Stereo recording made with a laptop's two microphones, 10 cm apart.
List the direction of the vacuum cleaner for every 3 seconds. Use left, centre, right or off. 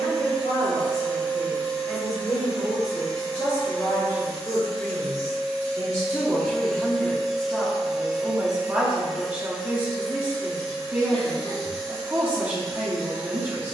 left, left, centre, left, left.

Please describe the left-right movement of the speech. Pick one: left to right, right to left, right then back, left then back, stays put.
left to right.